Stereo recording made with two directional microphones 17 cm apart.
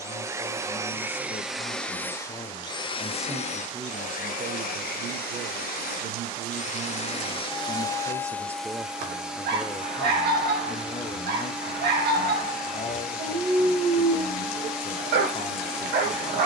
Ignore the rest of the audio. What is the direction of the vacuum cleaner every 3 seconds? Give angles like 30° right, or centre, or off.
centre, 50° left, 20° left, centre, centre, centre.